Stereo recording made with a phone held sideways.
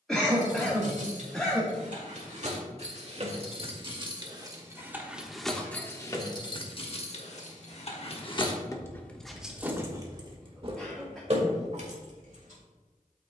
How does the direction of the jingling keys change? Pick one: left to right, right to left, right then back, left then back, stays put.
left then back.